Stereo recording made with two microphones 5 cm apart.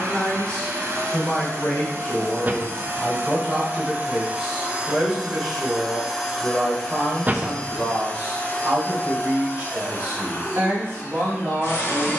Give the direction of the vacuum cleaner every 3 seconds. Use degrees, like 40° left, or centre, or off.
60° right, 20° right, 20° left, 40° left.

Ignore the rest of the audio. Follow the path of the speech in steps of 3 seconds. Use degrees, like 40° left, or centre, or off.
20° left, centre, 20° right, 30° right.